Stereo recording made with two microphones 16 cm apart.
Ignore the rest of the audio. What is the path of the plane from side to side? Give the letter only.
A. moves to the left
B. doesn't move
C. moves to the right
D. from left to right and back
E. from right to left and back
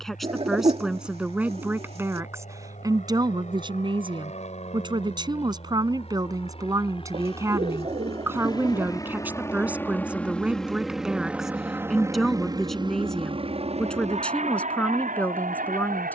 C.